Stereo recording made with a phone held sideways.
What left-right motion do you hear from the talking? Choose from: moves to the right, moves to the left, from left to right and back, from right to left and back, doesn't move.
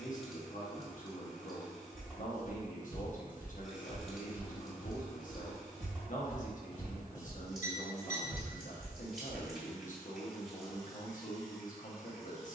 doesn't move.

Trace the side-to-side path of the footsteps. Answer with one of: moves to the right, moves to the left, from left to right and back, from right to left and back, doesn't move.
from right to left and back.